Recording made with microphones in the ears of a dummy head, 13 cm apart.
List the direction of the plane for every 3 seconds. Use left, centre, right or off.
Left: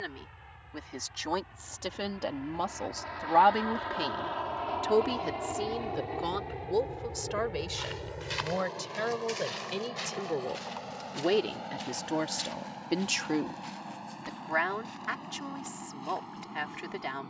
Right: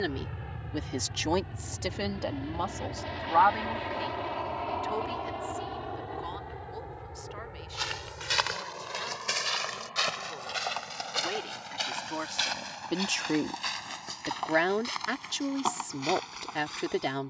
right, centre, left, left, left, left.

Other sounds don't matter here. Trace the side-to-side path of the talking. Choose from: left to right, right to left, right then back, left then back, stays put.
left then back.